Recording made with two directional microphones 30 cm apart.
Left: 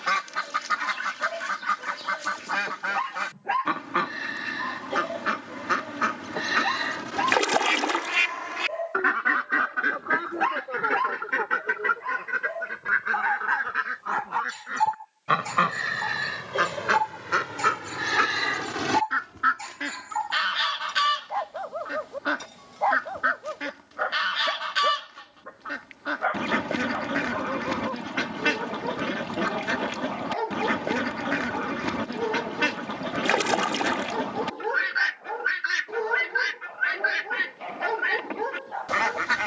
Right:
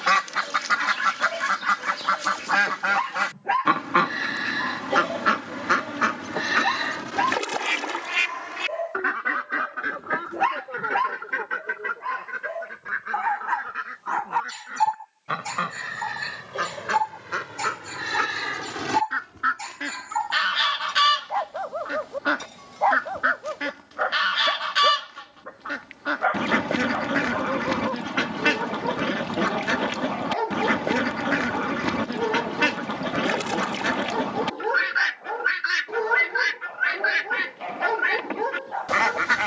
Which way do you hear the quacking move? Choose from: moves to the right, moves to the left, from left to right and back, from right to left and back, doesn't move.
from right to left and back.